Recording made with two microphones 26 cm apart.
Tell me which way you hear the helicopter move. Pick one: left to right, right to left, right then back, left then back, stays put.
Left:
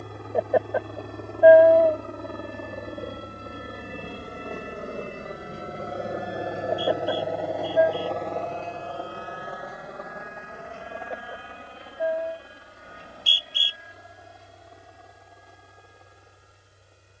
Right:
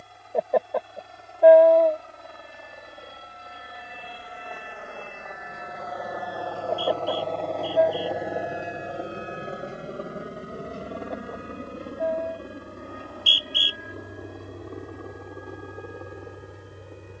left to right.